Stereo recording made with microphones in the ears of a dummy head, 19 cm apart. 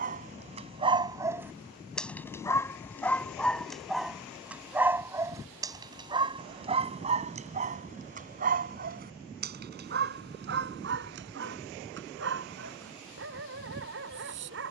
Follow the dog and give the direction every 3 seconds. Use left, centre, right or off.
centre, centre, right, right, right.